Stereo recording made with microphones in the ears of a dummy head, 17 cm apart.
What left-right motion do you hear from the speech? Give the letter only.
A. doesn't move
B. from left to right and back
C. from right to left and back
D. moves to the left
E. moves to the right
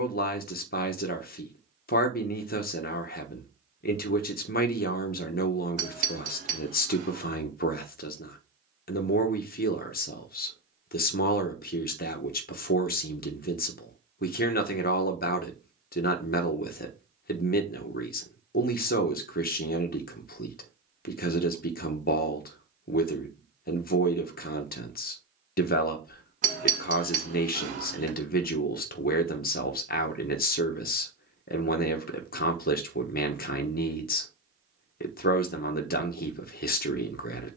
A.